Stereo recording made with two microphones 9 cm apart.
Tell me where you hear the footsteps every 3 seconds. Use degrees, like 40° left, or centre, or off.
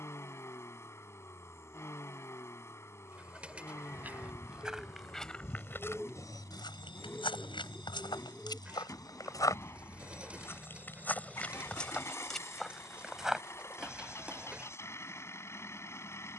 off, centre, 50° left, 20° left, 10° right, off.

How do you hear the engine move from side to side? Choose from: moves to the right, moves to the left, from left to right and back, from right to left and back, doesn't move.
doesn't move.